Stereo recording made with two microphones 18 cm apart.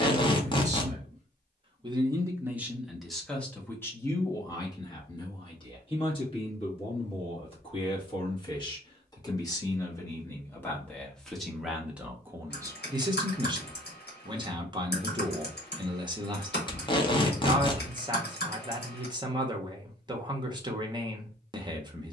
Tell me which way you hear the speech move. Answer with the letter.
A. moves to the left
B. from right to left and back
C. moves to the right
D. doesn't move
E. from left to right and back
B.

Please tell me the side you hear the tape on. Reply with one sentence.
In this clip you hear the tape on the left.